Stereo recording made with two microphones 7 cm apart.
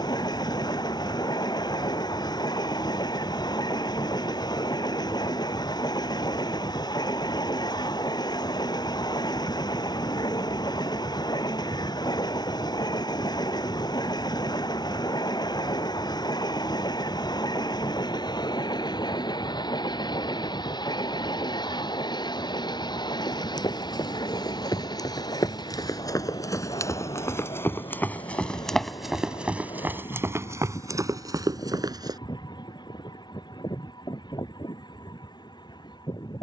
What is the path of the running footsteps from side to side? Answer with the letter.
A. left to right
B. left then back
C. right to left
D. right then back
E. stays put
A.